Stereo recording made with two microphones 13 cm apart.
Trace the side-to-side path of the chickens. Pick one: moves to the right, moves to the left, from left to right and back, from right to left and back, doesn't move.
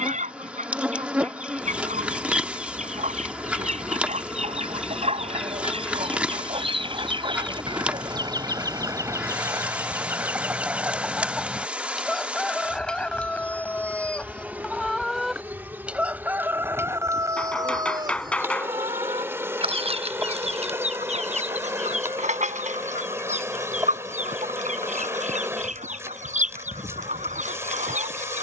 from right to left and back.